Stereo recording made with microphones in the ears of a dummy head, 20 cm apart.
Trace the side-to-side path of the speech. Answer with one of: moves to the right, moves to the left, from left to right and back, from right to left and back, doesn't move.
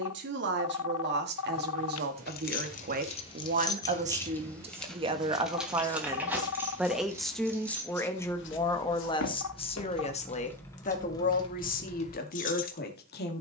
moves to the left.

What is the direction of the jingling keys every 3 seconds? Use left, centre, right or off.
left, centre, centre, centre, left.